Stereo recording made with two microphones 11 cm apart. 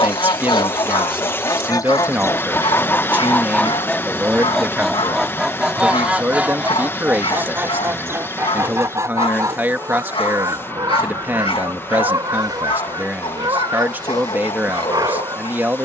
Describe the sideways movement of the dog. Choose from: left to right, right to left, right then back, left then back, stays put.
stays put.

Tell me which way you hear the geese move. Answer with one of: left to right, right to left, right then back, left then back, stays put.
left to right.